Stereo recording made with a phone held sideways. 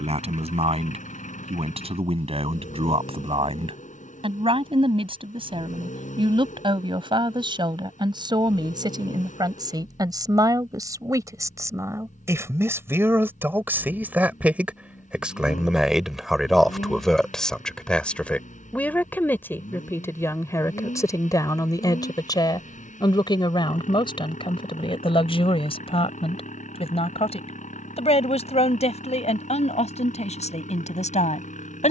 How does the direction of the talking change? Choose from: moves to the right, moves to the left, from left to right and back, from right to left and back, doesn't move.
moves to the left.